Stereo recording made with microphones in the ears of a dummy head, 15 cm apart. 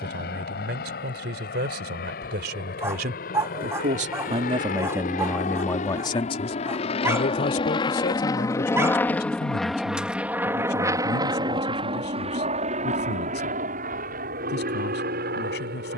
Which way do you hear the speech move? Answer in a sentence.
You can hear the speech move to the left.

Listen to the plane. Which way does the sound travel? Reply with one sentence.
In this clip you hear the plane move from left to right.